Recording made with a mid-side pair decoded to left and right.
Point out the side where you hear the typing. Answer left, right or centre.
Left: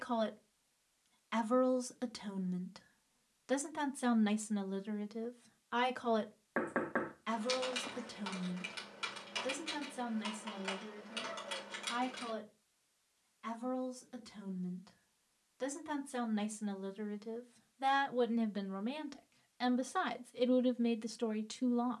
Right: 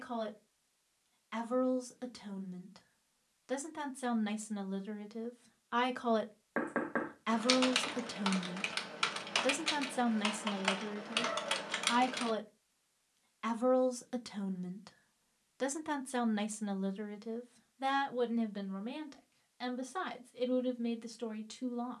right.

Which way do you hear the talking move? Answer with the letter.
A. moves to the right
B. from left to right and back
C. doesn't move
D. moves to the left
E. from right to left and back
B.